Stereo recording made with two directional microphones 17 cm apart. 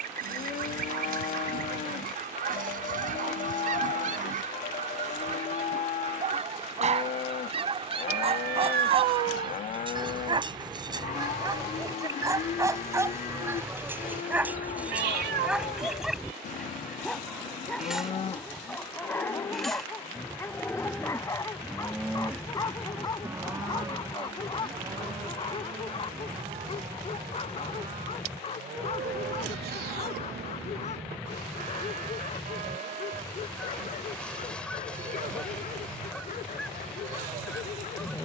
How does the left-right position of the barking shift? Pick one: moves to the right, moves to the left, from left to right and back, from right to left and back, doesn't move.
moves to the left.